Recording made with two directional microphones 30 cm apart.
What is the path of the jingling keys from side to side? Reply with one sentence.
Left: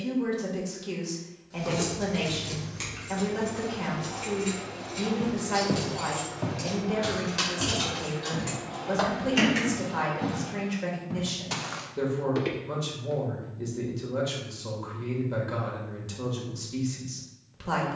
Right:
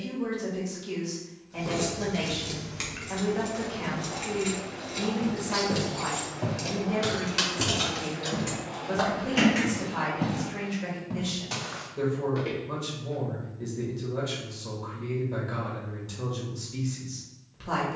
In this clip you hear the jingling keys go right and come back.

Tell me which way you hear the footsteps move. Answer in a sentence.
You can hear the footsteps go right and come back.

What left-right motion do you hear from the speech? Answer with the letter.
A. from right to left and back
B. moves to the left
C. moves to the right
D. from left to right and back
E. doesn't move
E.